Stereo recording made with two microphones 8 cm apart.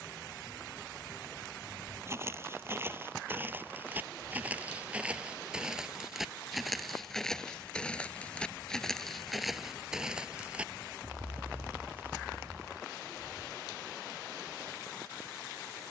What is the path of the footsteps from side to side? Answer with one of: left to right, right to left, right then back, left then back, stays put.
left then back.